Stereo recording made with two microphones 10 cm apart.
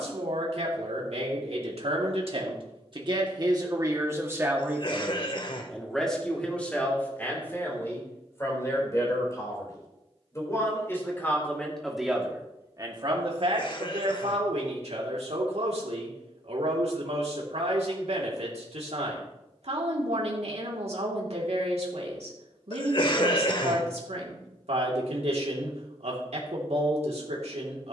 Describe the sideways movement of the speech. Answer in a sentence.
You can hear the speech go left and come back.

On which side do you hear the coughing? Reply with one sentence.
In this clip you hear the coughing on the left.